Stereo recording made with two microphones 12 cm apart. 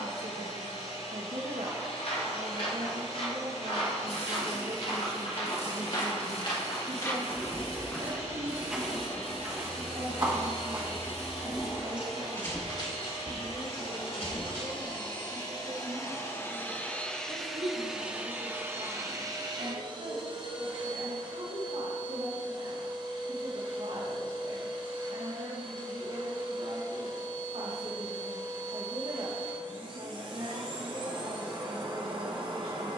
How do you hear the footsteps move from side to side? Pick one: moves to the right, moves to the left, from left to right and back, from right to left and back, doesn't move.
from left to right and back.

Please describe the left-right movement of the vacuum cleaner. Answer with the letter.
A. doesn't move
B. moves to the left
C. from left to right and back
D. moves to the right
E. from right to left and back
D.